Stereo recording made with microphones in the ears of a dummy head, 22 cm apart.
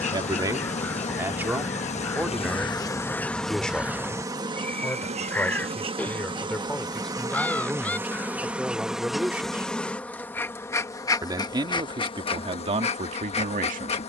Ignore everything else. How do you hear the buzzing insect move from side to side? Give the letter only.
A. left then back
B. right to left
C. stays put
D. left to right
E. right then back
E.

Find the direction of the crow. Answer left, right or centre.
centre.